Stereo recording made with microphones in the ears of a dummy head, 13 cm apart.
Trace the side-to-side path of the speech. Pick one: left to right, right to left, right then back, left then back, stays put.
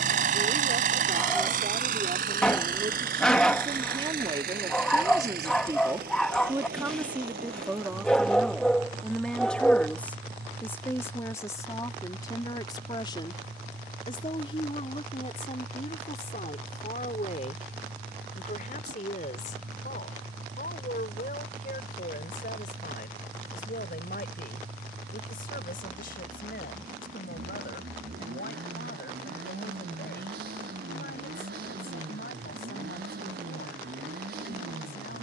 right to left.